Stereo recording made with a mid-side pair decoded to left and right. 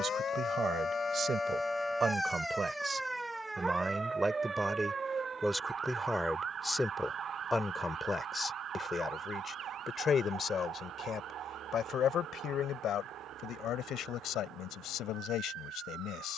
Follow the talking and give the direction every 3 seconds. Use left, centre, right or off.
right, centre, centre, left, left, left.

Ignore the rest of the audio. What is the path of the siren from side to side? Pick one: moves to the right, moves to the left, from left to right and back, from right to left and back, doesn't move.
moves to the right.